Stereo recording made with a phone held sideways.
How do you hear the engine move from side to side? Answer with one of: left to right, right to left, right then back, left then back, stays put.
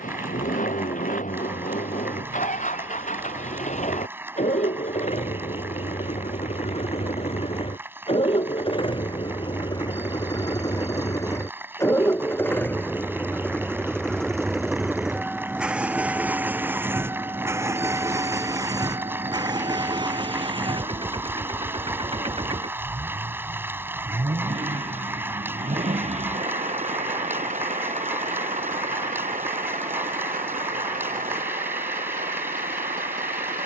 left to right.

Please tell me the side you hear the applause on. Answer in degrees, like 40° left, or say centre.
10° right.